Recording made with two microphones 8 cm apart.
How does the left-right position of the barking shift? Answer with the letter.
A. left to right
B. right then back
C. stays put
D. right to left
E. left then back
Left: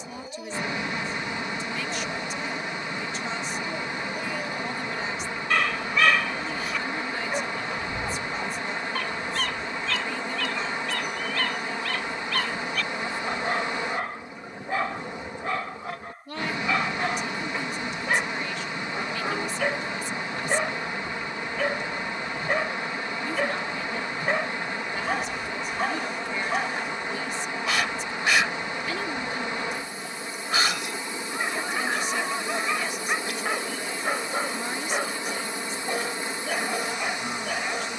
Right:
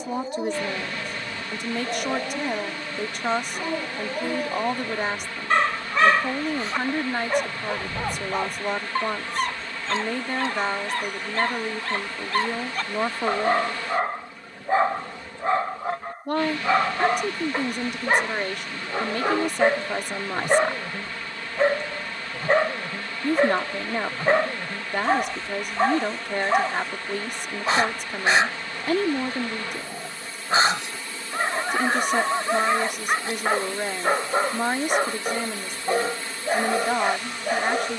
C.